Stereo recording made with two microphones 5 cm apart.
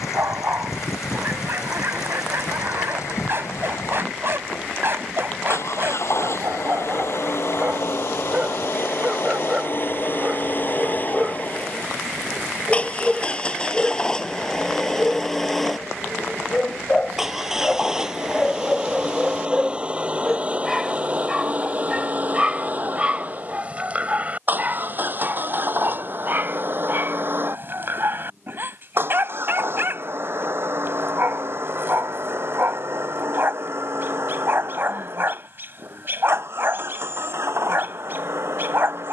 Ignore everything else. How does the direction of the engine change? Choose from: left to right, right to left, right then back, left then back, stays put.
left to right.